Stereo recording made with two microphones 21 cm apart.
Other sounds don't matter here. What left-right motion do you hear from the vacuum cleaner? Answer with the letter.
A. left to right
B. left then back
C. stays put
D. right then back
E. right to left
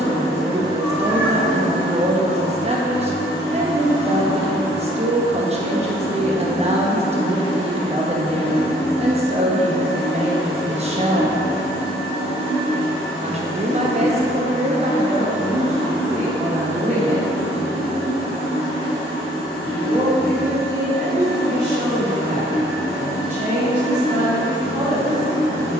C.